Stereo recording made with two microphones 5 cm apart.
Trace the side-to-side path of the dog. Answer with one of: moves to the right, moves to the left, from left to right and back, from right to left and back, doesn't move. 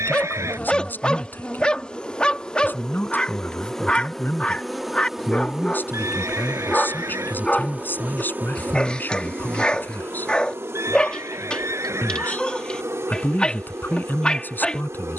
doesn't move.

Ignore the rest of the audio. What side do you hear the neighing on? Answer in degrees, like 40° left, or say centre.
80° right.